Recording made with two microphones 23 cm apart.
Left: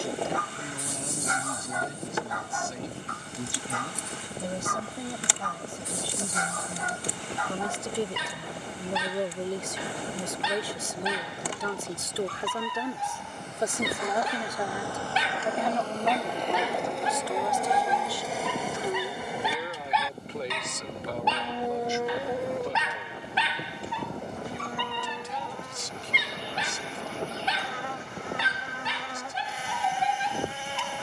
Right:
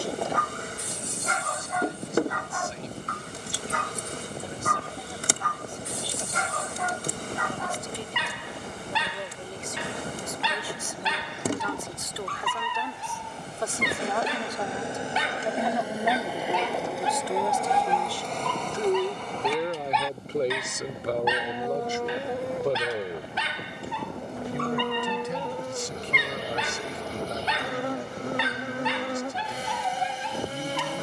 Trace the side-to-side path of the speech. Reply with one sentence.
You can hear the speech travel towards the right.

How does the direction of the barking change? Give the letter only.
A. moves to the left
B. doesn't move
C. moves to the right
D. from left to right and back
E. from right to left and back
E.